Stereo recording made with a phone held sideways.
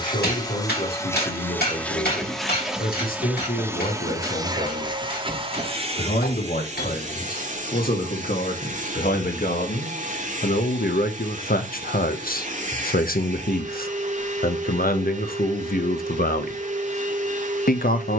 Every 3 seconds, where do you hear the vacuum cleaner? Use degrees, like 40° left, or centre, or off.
10° left, 20° right, 50° right, 50° right, 50° right, 50° right.